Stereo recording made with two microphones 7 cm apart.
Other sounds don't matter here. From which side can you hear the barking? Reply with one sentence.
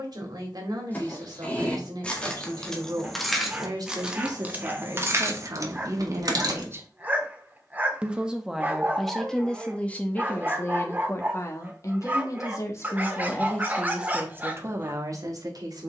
You can hear the barking on the right.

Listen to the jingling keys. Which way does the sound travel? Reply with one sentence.
In this clip you hear the jingling keys move to the right.